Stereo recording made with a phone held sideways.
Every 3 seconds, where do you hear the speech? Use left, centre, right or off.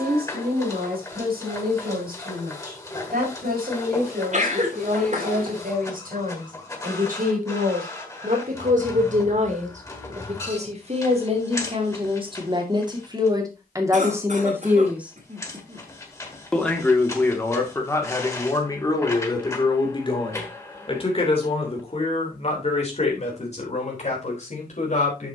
right, right, right, right, right, centre, left, left, left.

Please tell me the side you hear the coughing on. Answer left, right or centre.
right.